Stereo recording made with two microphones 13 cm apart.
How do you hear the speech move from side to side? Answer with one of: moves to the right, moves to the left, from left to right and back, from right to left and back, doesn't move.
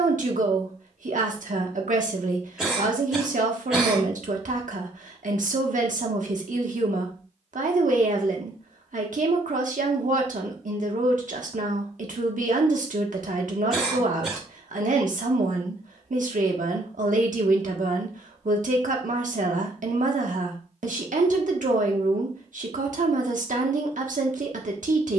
doesn't move.